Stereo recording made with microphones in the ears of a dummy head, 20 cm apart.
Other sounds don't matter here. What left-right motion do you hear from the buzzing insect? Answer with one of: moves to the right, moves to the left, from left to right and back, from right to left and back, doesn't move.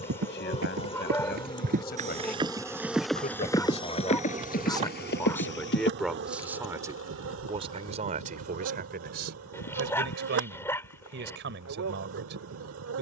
moves to the right.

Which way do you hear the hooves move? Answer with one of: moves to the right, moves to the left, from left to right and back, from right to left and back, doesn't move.
moves to the left.